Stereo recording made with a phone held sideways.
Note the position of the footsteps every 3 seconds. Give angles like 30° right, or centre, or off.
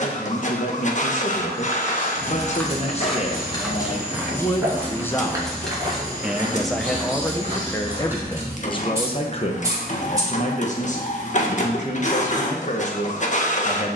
10° left, 10° right, 30° right, off, off.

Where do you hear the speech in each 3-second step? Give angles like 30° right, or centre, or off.
50° left, 20° left, 10° left, 40° left, 50° left.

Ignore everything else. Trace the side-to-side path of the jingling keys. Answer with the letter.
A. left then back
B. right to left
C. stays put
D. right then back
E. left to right
E.